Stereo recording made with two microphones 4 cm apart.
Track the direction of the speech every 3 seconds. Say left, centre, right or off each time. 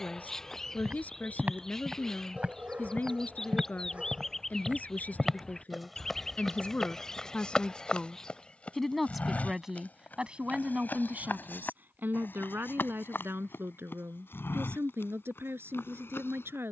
left, left, left, right, right, right.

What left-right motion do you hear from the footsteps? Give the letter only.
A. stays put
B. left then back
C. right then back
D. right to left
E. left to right
D.